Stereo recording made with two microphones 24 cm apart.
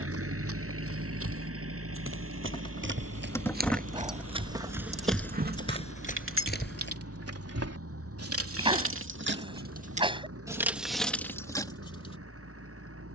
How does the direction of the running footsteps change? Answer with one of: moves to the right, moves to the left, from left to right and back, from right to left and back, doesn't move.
moves to the left.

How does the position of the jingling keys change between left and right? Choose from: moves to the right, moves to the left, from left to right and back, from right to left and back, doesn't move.
from left to right and back.